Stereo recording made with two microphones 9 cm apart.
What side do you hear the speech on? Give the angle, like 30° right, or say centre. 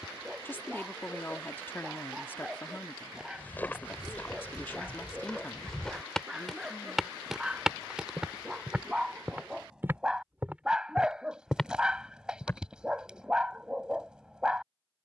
20° left.